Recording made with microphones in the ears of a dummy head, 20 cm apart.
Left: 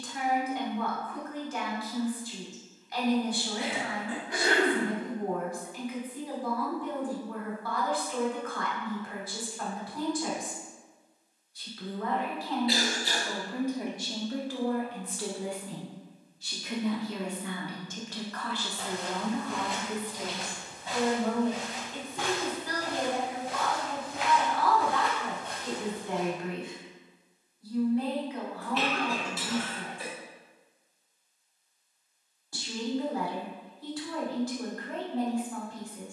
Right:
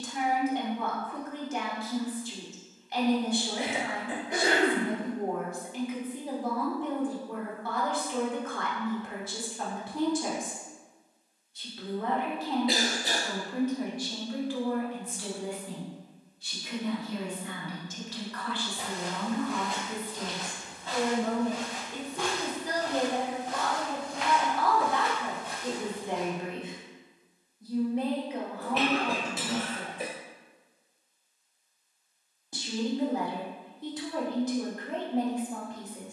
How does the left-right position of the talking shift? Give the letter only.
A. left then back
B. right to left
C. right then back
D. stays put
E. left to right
A.